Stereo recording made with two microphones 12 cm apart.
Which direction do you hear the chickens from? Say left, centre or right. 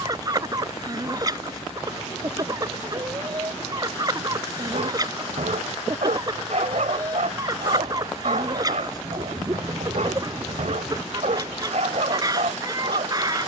right.